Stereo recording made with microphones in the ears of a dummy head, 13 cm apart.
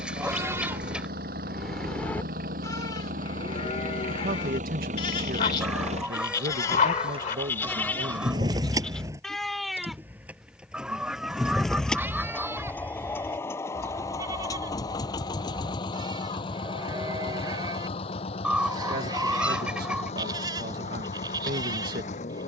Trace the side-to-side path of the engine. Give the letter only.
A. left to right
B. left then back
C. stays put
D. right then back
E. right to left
E.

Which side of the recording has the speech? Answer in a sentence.
You can hear the speech on the right.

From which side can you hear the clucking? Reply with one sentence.
In this clip you hear the clucking in the centre.